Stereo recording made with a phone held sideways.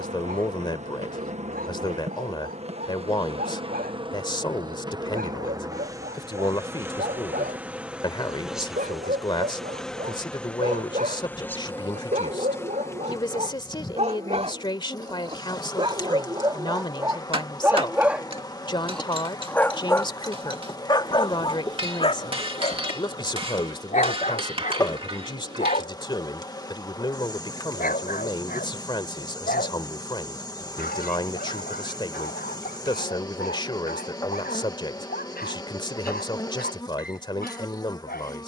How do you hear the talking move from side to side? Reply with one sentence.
In this clip you hear the talking stay put.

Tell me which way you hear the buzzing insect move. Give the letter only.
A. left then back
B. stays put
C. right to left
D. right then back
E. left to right
C.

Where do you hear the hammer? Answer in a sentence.
You can hear the hammer on the right.